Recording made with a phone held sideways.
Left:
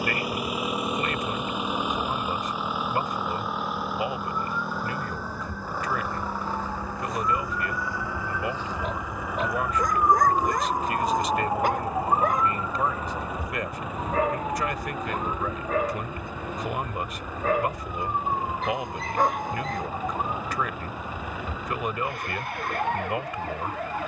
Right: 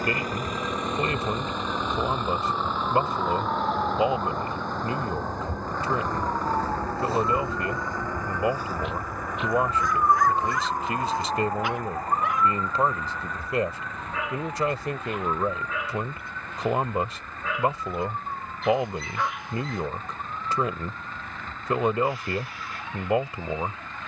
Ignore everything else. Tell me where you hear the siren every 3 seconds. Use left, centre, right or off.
right, right, right, centre, left, left, left, left.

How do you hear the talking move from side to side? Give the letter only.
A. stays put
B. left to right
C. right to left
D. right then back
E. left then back
A.